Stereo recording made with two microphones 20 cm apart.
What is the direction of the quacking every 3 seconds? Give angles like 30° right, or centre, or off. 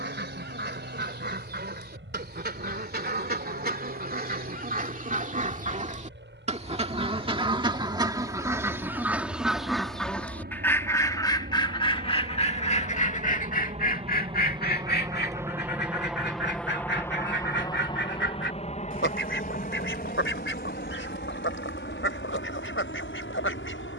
50° right, 40° right, 20° right, 10° left, 40° left, 60° left, 70° left, 80° left.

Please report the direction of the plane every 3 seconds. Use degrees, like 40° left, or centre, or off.
80° right, 70° right, 70° right, 60° right, 30° right, centre, 40° left, 60° left.